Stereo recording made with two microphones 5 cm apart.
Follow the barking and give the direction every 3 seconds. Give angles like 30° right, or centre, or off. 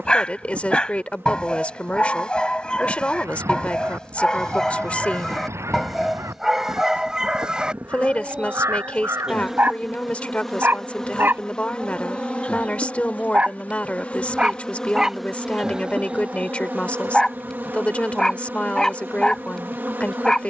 20° left, 10° left, 20° right, 40° right, 30° right, centre, 10° left.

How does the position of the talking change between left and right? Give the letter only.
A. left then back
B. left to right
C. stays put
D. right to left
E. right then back
C.